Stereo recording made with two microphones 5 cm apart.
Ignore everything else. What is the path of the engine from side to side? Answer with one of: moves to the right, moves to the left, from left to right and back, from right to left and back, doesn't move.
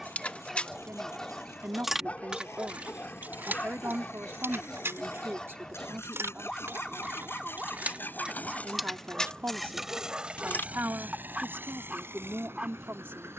moves to the right.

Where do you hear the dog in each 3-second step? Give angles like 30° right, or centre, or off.
20° left, 20° left, centre, 20° right, 20° right.